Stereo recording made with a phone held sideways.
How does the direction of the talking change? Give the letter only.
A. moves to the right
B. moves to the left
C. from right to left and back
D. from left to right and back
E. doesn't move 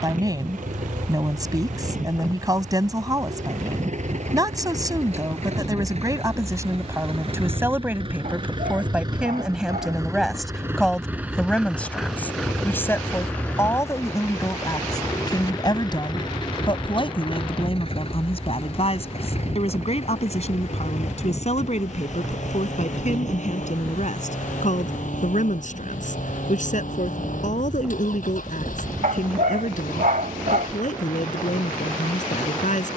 B.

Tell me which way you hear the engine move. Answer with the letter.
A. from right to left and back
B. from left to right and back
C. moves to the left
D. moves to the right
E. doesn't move
C.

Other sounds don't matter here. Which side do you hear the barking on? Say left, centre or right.
right.